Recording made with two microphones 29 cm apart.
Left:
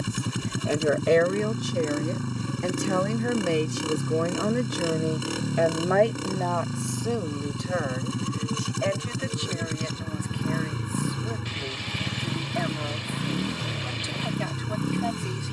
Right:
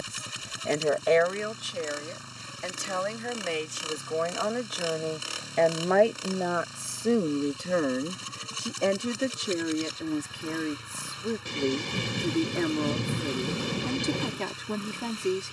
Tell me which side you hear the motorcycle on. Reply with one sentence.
In this clip you hear the motorcycle on the left.